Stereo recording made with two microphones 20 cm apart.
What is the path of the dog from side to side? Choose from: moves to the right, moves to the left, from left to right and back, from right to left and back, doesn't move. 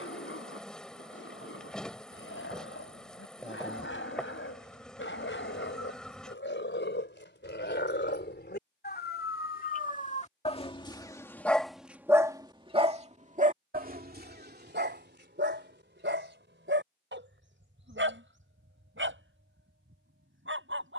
moves to the right.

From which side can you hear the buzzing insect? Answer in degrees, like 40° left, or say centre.
centre.